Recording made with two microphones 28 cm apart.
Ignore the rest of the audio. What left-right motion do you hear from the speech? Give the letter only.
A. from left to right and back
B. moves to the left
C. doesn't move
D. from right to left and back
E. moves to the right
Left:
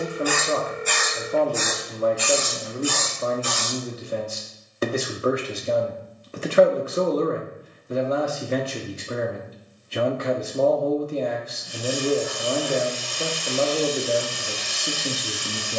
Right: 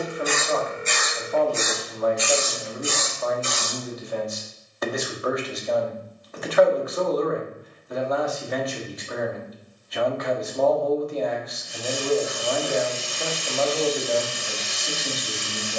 C.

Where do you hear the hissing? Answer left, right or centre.
right.